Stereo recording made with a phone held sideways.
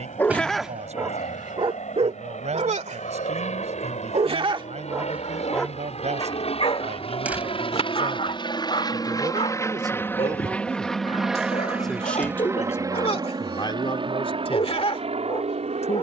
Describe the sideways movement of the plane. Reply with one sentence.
You can hear the plane move from left to right.